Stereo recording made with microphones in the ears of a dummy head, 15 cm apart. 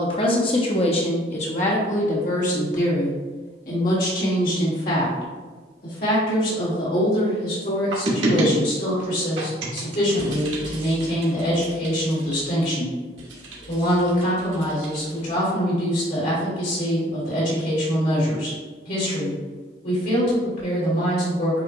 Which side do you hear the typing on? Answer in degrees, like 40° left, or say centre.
80° right.